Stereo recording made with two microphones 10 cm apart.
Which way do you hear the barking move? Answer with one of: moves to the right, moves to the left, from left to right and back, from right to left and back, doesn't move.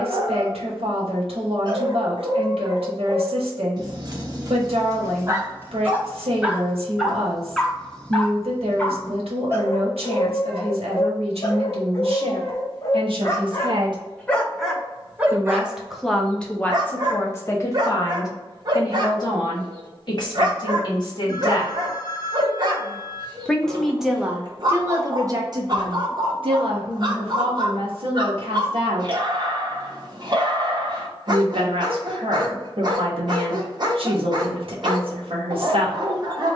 from right to left and back.